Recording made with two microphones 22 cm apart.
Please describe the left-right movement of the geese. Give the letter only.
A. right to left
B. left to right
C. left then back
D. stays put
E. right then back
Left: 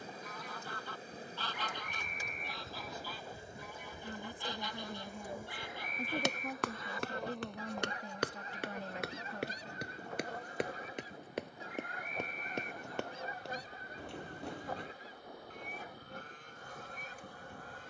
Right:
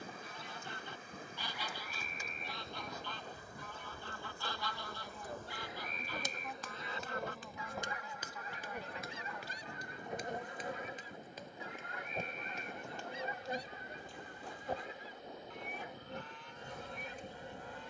A.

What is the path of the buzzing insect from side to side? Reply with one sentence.
You can hear the buzzing insect move from left to right.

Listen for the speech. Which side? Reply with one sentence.
In this clip you hear the speech on the left.